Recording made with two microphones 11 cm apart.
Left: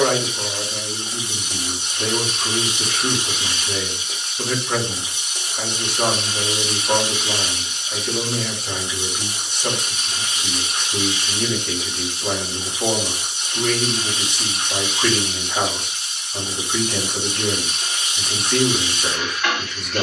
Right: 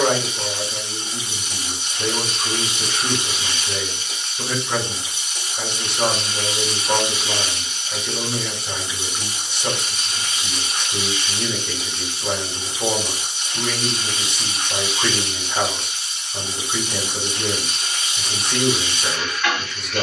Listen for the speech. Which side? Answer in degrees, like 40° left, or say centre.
centre.